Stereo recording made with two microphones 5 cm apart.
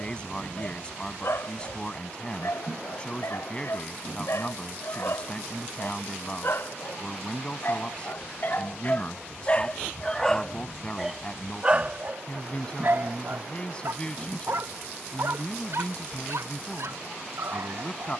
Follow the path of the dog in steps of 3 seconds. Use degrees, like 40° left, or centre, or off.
70° left, 70° left, 50° left, centre, 50° right, 70° right.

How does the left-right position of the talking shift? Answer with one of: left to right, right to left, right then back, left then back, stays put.
stays put.